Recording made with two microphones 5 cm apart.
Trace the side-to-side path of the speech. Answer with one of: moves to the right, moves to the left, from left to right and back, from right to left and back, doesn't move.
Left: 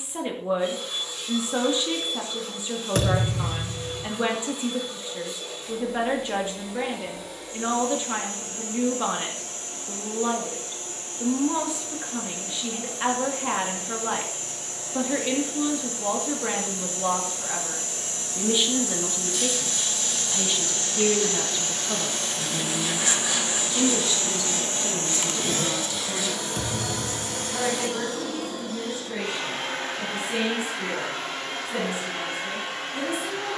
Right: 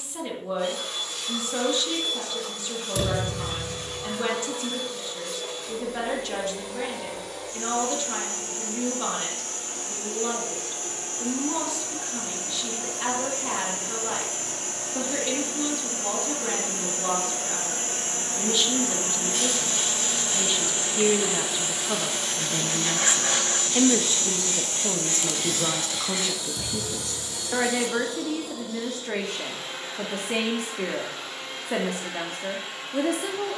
moves to the right.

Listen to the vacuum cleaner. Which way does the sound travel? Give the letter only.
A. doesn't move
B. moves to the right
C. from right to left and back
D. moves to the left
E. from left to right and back
D.